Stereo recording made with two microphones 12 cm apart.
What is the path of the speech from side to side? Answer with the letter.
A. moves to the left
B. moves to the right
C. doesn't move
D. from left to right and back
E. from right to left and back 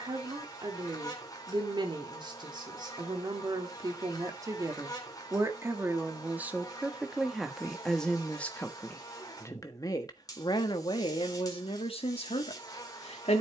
A.